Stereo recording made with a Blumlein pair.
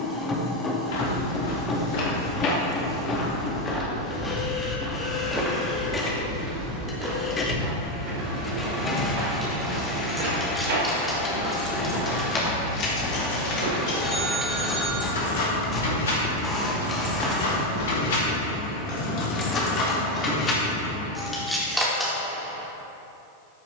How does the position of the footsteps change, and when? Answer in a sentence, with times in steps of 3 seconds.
You can hear the footsteps on the left from 0 s, in the centre from 3 s, on the right from 6 s, in the centre from 15 s and not at all from 18 s.